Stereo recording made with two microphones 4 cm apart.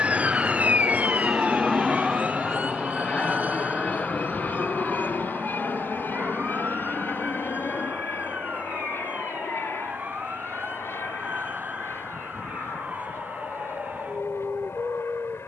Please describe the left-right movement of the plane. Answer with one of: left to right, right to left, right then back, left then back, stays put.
right to left.